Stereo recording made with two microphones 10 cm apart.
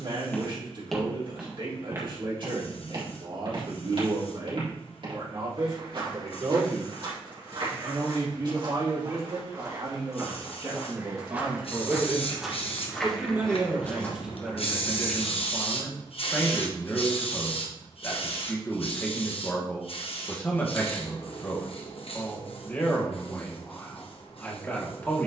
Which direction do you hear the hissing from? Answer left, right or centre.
left.